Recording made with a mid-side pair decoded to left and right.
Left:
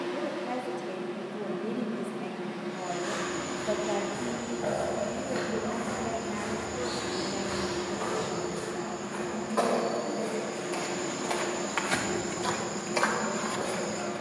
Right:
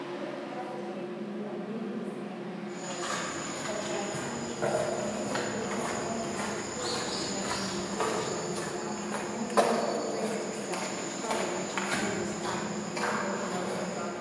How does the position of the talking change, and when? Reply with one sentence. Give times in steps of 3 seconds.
You can hear the talking on the left from 0 s, in the centre from 6 s and on the right from 9 s.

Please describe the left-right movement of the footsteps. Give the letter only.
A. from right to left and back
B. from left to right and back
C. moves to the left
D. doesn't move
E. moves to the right
C.